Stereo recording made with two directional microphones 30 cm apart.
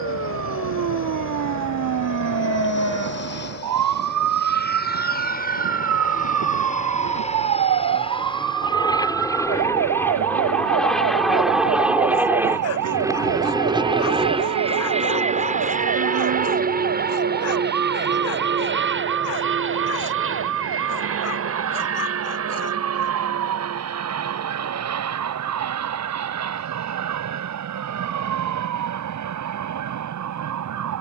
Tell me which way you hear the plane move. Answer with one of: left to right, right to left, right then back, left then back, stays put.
left to right.